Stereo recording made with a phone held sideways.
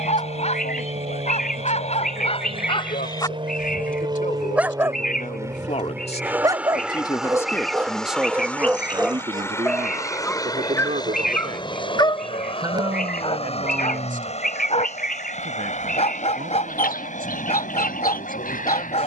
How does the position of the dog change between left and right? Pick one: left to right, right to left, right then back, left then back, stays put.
right then back.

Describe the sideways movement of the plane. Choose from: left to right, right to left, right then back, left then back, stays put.
right to left.